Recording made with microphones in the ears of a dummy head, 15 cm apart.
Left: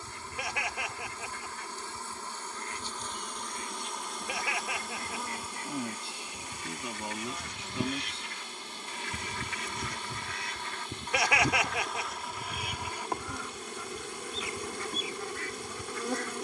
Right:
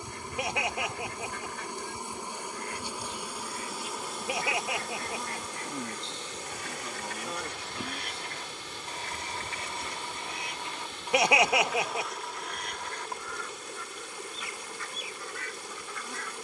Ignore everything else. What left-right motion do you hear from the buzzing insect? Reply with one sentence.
In this clip you hear the buzzing insect go from the right side to the left.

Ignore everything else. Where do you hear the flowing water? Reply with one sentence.
In this clip you hear the flowing water on the right.